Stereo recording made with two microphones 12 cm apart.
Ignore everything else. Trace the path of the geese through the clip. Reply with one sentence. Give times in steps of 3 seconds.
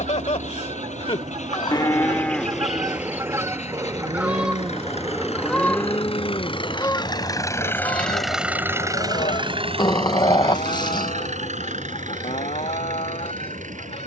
You can hear the geese on the right from 0 s, in the centre from 3 s and on the left from 6 s.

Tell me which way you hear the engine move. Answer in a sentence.
In this clip you hear the engine move from left to right.